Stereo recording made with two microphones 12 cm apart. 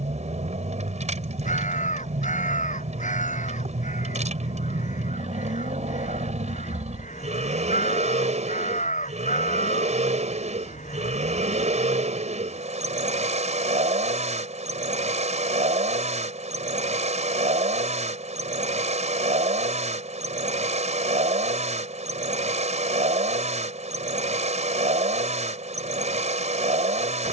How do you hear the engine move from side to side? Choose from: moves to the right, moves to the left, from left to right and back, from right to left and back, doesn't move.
doesn't move.